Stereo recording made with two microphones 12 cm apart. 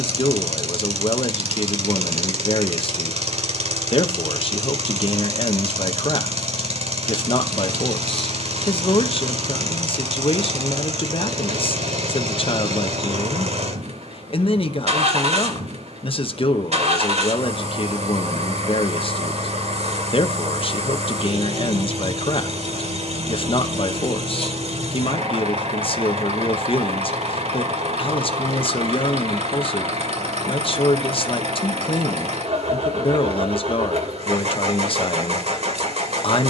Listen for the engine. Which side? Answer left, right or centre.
right.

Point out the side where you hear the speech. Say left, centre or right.
left.